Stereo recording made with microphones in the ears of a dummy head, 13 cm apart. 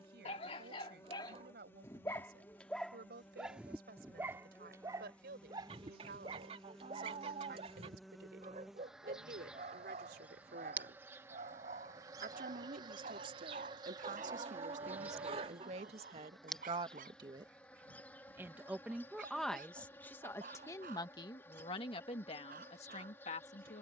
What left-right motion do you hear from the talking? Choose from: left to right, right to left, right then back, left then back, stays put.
right to left.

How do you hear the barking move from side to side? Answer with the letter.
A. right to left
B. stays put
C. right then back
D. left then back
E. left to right
E.